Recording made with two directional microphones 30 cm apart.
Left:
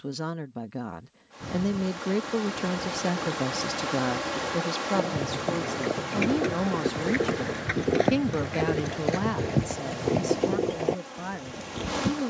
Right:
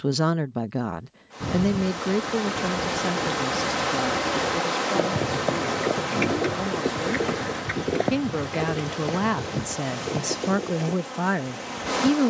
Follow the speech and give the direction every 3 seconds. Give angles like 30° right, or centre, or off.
20° right, 20° left, 10° left, 40° right.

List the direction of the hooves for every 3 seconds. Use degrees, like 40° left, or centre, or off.
60° right, 40° right, centre, 40° left.